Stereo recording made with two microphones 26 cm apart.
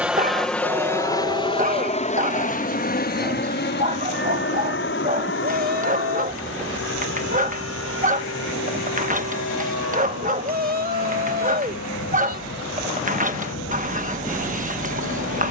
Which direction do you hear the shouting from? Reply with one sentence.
In this clip you hear the shouting on the right.